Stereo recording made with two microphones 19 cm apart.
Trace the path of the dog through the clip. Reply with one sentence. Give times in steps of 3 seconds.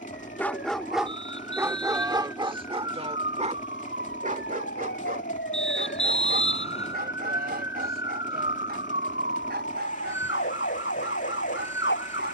You can hear the dog in the centre from 0 s and on the right from 3 s.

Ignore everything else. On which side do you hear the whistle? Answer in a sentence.
In this clip you hear the whistle on the left.